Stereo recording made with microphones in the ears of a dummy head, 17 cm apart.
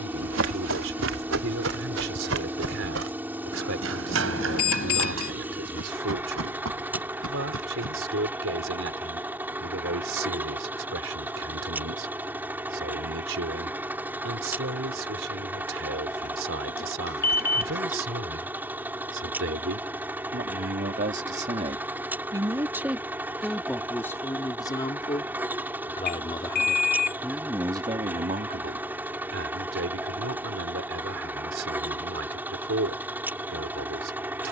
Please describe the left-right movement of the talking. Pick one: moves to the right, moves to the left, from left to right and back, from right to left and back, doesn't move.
from right to left and back.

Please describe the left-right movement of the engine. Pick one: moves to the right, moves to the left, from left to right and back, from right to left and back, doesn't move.
doesn't move.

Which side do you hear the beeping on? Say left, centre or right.
left.